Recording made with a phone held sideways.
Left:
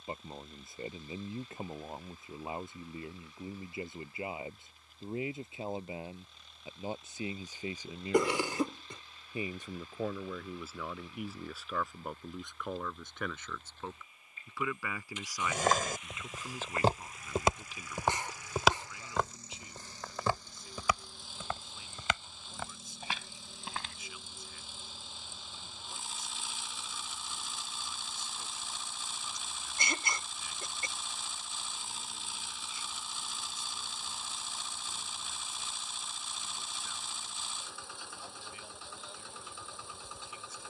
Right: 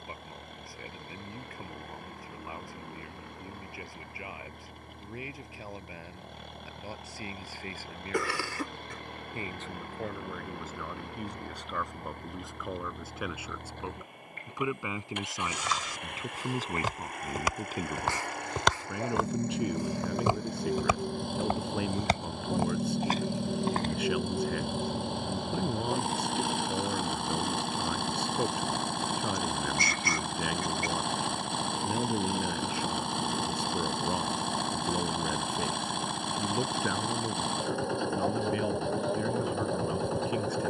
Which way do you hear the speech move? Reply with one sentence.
You can hear the speech travel towards the right.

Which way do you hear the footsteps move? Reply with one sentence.
In this clip you hear the footsteps travel towards the right.